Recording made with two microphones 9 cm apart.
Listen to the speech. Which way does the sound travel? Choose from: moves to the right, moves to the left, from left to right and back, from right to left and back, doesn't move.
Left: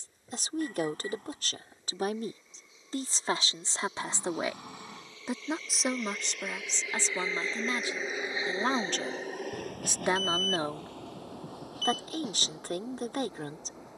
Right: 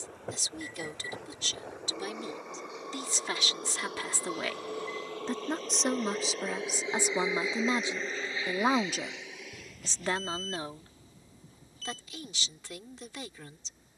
from left to right and back.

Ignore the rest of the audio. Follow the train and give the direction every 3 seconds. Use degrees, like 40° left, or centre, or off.
70° right, 50° right, 10° right, 60° left, 80° left.